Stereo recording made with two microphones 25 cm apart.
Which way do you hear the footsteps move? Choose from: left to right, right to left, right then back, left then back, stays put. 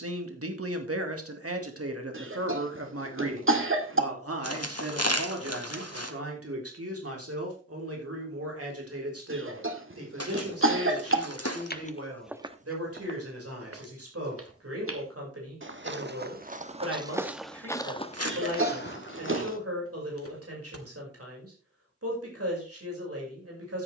right then back.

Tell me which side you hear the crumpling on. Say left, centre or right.
left.